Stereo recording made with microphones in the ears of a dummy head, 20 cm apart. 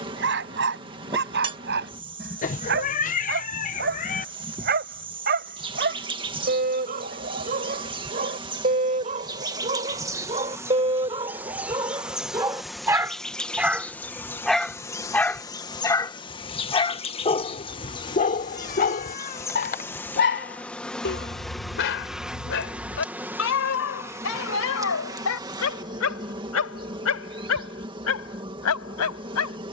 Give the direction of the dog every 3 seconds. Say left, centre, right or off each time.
right, right, right, right, centre, left, left, left, left, left.